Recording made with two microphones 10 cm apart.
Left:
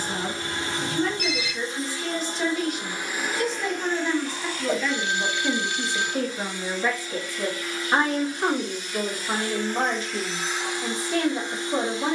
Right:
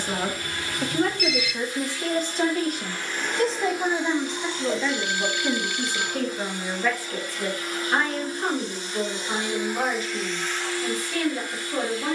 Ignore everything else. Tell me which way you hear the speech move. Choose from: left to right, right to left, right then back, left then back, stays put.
right to left.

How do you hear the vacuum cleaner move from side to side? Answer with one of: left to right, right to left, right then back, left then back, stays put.
right then back.